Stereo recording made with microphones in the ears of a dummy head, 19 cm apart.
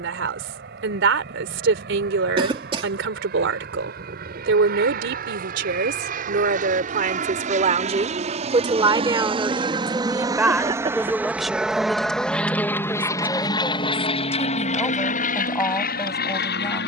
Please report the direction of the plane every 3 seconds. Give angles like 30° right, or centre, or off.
60° right, 50° right, 40° right, 20° right, 20° left, 50° left.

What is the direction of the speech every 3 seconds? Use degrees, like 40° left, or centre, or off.
70° right, 60° right, 40° right, 10° right, 10° left, 20° left.